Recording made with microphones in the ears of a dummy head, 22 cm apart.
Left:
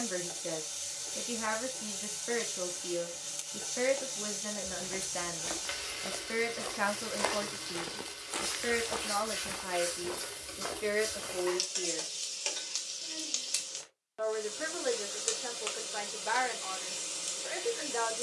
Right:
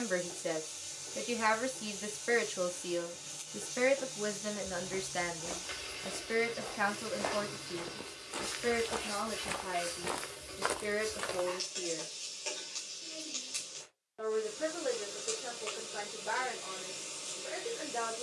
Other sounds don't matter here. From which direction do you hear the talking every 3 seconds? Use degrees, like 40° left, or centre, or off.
30° right, 10° right, 10° left, 30° left, 50° left, 50° left.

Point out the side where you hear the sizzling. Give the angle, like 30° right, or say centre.
40° left.